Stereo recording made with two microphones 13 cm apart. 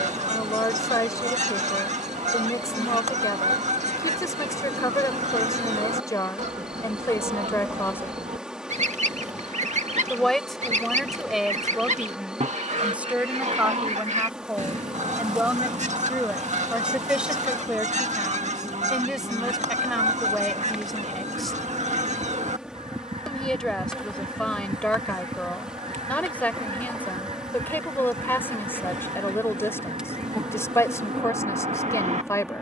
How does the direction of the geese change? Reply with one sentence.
In this clip you hear the geese stay in one place.